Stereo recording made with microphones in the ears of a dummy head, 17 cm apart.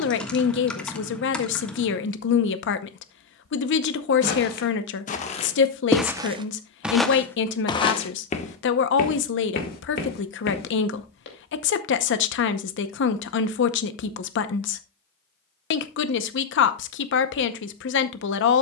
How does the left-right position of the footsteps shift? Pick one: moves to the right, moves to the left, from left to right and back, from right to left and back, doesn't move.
from left to right and back.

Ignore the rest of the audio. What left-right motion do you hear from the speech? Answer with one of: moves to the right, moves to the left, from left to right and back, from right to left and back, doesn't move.
doesn't move.